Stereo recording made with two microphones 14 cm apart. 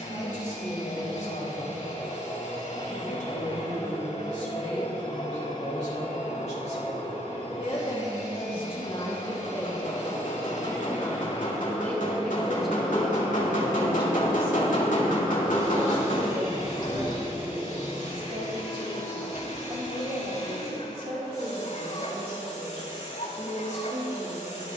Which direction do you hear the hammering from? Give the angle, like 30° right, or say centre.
80° left.